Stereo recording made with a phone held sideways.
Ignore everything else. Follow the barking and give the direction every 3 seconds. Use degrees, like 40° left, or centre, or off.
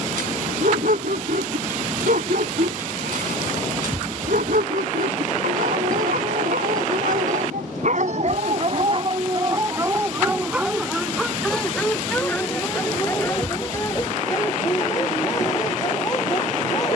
80° right, 80° right, 70° right, 10° right, 20° left, 20° left.